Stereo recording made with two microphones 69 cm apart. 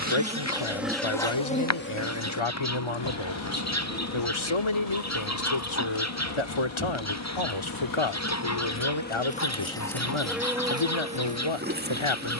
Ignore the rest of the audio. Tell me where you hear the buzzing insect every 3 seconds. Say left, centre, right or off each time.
centre, left, left, centre.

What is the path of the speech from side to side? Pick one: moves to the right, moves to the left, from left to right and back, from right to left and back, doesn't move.
doesn't move.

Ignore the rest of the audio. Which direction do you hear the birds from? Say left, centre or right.
left.